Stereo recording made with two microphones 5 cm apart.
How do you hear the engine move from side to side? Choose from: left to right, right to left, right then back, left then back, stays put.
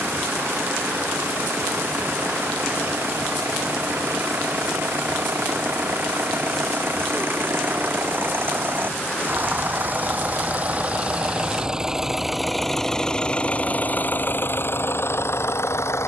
right to left.